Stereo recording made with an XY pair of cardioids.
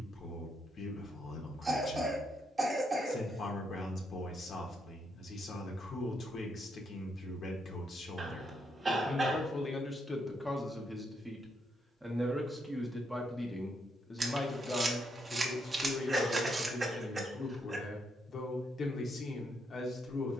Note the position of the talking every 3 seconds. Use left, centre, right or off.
left, left, left, centre, centre, left, left.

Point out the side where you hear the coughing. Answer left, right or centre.
right.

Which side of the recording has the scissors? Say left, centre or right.
right.